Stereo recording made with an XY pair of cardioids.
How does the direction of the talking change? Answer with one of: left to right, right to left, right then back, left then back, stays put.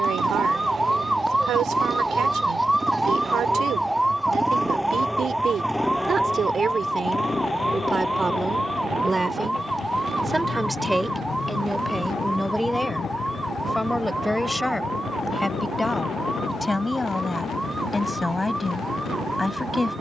right to left.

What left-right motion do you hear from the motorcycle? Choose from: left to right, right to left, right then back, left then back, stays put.
right to left.